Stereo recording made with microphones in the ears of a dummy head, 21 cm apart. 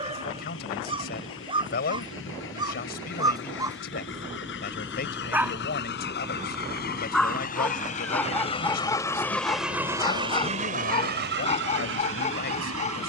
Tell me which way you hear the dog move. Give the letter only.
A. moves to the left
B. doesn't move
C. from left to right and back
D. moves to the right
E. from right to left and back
A.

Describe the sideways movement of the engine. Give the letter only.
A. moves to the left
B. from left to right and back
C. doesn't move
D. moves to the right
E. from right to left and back
D.